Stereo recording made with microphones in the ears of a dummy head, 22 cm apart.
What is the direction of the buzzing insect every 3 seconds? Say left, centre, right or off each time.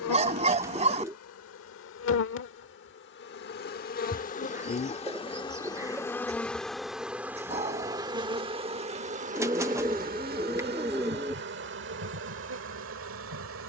left, left, centre, right, right.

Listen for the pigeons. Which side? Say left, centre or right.
centre.